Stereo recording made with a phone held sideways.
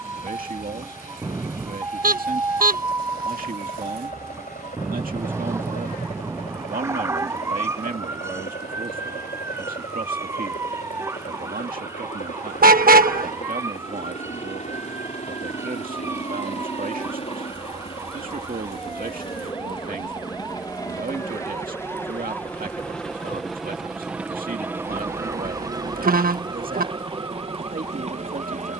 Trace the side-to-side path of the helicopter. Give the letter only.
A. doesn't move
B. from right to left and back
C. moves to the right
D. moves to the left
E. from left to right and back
C.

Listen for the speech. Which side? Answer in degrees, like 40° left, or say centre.
60° right.